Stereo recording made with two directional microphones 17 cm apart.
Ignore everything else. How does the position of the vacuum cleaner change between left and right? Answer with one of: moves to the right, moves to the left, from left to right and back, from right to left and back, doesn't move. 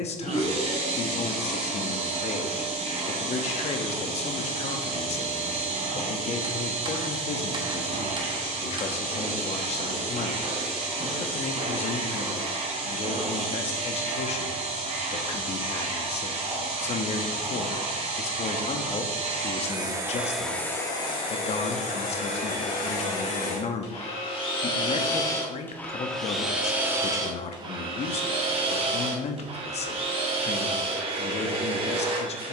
from right to left and back.